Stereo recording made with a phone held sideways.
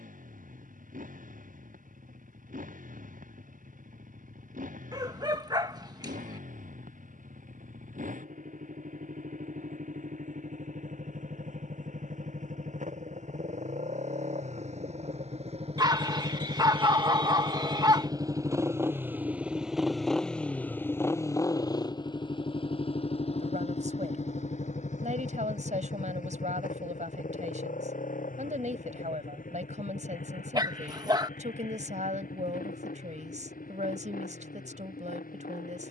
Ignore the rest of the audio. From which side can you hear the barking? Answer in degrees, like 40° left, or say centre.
30° right.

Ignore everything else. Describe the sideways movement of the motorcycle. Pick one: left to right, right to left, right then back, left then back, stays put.
right to left.